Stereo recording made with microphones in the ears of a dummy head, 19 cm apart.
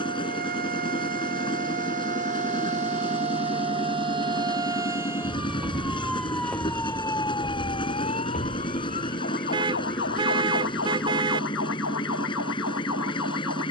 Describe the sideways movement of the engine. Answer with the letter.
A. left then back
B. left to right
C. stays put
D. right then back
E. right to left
C.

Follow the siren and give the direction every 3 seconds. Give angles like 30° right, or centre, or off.
40° right, 20° right, 20° left, 60° left, 70° left.